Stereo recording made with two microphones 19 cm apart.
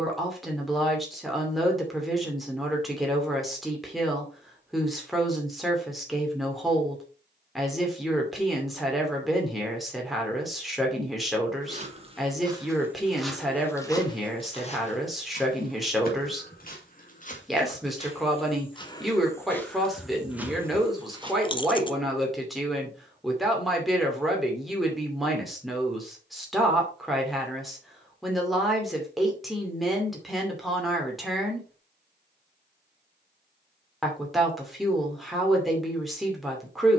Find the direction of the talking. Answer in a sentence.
You can hear the talking in the centre.